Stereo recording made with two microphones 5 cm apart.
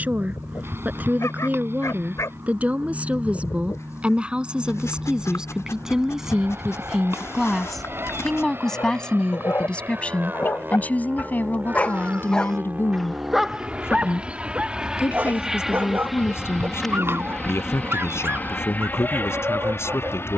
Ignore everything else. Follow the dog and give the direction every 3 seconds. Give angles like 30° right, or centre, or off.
80° left, 80° left, 70° left, 40° left, 10° right, 50° right, 50° right.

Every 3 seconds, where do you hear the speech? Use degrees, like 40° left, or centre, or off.
30° right, 20° right, centre, 30° left, 50° left, 60° left, 60° left.